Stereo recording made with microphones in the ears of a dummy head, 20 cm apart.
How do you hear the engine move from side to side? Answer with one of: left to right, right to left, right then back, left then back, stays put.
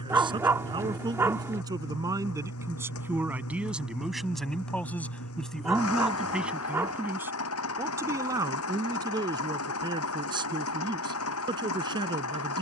stays put.